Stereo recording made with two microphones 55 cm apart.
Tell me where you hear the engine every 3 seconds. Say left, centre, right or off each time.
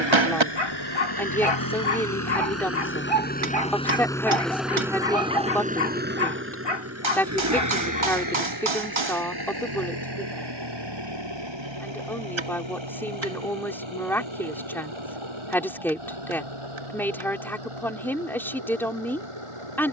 left, centre, right, right, right, right, right.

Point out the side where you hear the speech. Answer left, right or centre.
centre.